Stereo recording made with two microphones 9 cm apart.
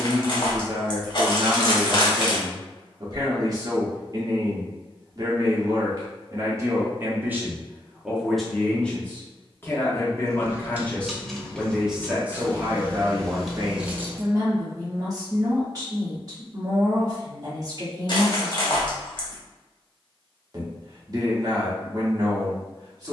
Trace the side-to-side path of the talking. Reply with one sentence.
In this clip you hear the talking move from right to left and back again.